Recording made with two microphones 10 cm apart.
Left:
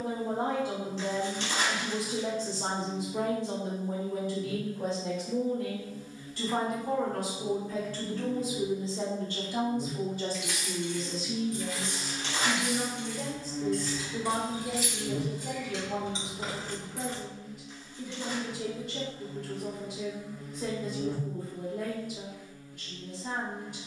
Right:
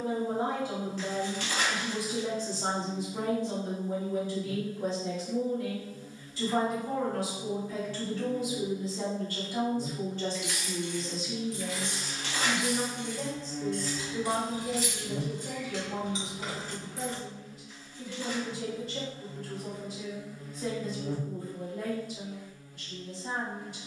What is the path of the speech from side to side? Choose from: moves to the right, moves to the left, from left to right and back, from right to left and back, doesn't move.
from left to right and back.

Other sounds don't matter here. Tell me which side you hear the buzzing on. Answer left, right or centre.
left.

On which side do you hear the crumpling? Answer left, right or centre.
left.